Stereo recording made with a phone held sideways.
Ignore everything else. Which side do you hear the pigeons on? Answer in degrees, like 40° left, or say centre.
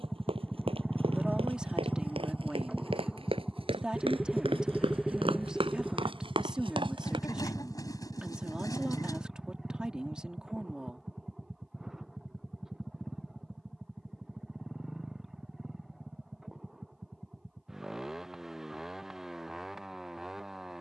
30° left.